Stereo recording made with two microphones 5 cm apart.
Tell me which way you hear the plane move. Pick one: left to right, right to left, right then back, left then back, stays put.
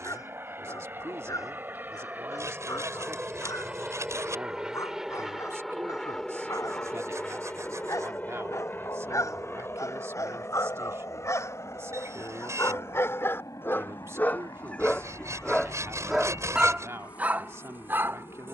right to left.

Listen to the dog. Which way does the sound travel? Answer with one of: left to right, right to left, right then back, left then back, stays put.
left to right.